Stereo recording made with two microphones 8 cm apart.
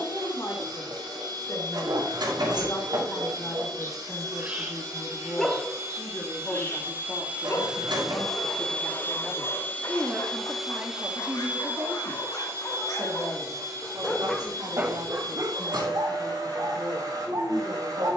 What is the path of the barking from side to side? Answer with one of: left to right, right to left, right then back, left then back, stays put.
left then back.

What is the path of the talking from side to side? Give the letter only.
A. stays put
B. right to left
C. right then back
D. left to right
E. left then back
D.